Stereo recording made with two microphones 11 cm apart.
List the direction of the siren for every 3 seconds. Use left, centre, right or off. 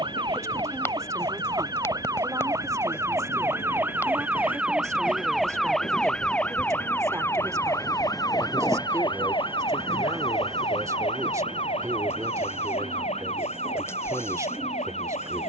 right, centre, left, left, left.